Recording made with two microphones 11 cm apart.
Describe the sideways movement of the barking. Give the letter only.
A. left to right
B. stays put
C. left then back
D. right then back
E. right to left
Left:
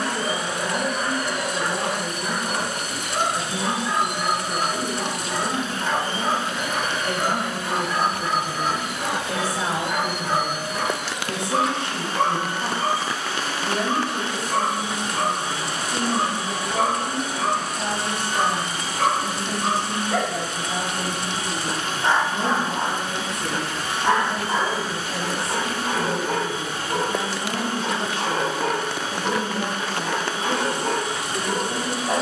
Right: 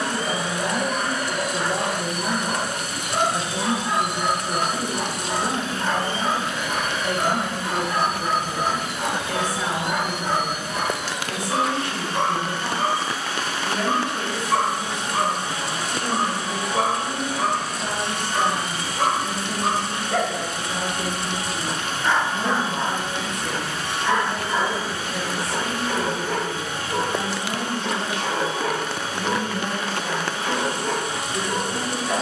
E.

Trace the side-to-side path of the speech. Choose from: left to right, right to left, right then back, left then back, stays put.
right to left.